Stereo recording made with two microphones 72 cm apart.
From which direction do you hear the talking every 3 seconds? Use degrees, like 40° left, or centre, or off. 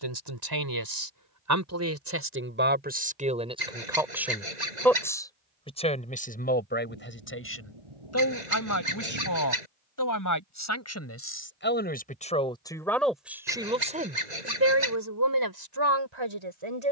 20° right, centre, 20° left, 20° left, centre, 30° right.